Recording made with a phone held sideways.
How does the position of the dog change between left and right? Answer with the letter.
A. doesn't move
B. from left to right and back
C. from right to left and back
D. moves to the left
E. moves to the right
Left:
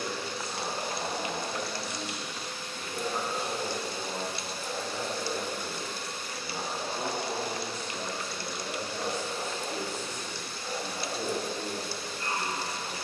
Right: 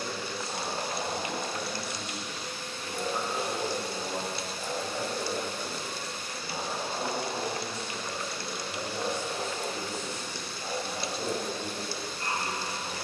A.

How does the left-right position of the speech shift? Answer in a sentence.
You can hear the speech go right and come back.